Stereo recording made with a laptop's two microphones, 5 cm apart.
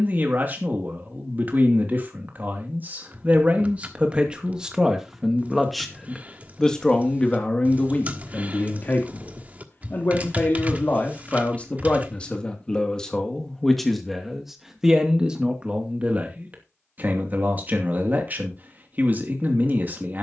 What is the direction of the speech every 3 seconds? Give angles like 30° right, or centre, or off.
40° right, 20° right, 20° left, 40° left, 10° left, 30° right, 40° right.